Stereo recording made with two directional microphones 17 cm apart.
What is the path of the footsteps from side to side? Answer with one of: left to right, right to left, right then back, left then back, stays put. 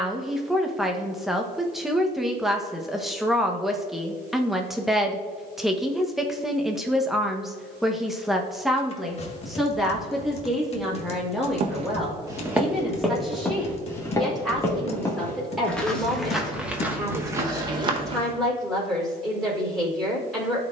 left then back.